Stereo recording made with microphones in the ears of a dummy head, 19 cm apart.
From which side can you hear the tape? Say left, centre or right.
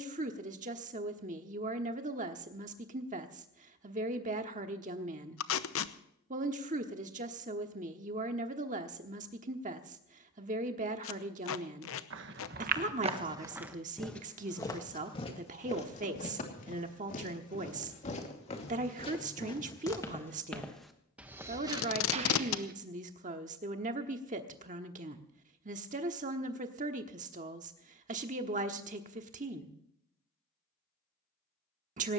left.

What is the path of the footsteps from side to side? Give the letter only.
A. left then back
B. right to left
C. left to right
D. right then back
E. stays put
A.